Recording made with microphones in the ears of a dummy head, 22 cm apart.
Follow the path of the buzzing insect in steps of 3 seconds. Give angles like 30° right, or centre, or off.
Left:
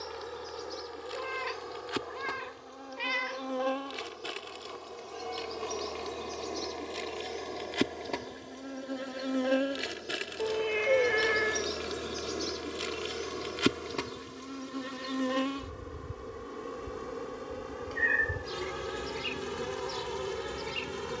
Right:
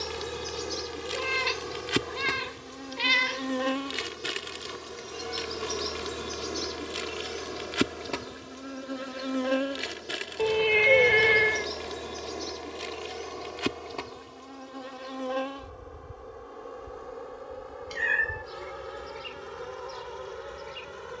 40° right, 30° right, 10° right, 10° left, 20° left, 40° left, 50° left.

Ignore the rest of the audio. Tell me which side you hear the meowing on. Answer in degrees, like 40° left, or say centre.
50° right.